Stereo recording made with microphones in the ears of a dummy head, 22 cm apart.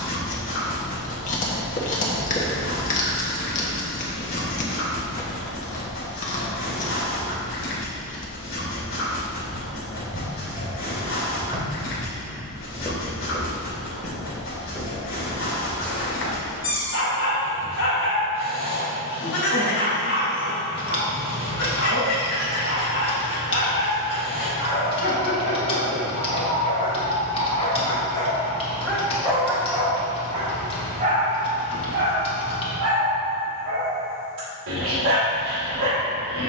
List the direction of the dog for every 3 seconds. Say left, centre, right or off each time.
left, left, left, left, left, left, left, left, left, centre, right, right.